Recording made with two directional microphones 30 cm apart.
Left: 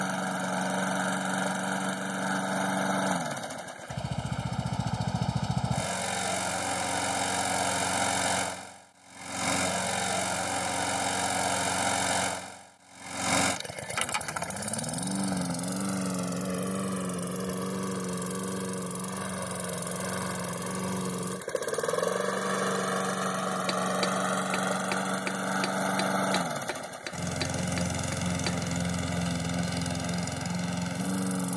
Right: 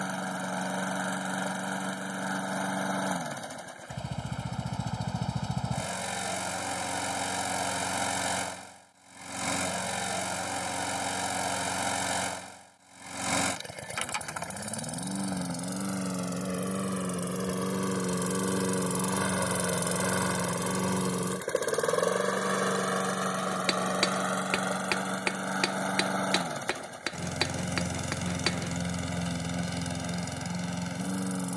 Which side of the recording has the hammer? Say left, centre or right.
right.